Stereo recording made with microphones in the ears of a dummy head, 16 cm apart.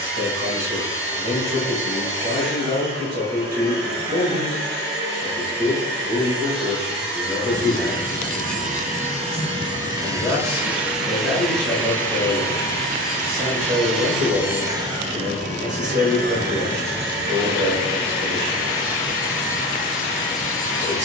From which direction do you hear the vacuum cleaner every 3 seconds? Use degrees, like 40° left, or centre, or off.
60° right, 60° right, 50° right, 10° right, centre, 50° right, 60° right.